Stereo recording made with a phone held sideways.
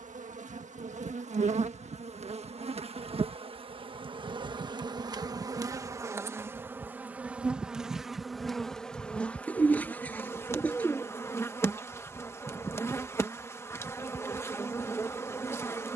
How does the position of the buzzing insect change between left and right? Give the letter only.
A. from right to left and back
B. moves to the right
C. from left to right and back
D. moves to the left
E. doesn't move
D.